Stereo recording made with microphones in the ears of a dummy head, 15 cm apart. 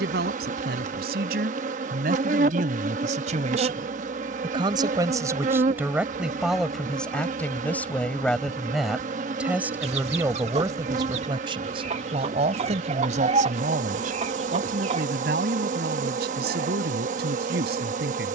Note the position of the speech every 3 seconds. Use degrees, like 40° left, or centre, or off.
60° right, 30° right, centre, 20° right, 50° right, 60° right.